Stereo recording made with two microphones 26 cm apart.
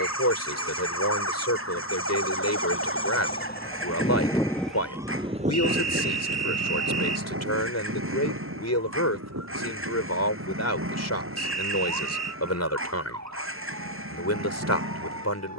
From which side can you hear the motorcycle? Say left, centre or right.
right.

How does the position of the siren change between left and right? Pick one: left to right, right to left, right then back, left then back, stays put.
left to right.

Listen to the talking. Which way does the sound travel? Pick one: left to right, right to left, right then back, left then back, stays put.
stays put.